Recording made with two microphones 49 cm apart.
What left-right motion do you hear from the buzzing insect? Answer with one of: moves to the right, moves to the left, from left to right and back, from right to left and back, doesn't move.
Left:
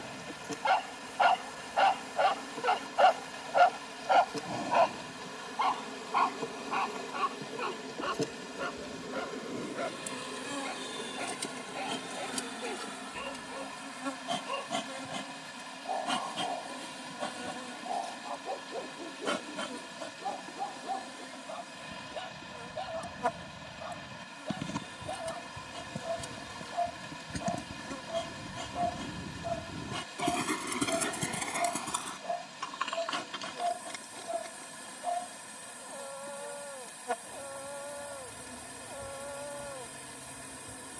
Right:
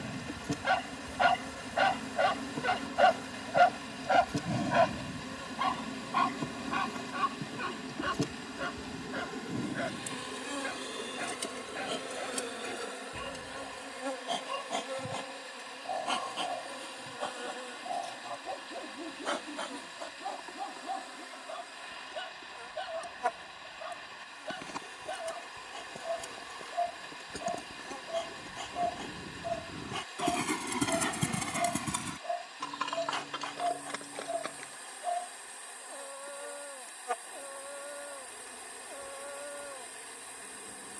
moves to the left.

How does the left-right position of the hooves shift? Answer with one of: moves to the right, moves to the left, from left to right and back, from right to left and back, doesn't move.
moves to the right.